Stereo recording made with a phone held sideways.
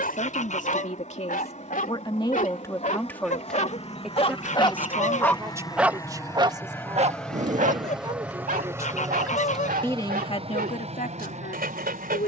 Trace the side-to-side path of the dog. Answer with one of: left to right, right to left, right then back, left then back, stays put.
left to right.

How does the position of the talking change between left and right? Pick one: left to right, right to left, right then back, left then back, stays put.
right then back.